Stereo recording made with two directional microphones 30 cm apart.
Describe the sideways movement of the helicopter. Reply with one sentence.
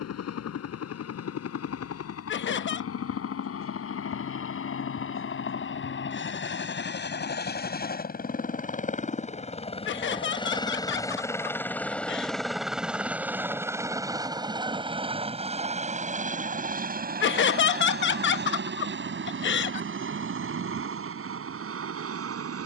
In this clip you hear the helicopter travel towards the right.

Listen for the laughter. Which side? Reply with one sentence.
In this clip you hear the laughter on the left.